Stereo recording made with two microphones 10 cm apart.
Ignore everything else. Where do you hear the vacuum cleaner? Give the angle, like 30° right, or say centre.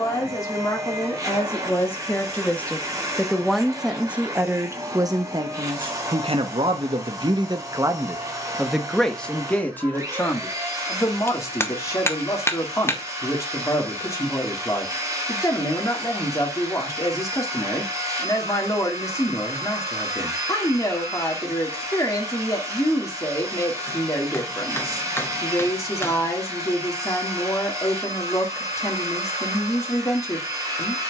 30° right.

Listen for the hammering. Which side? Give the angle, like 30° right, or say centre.
20° left.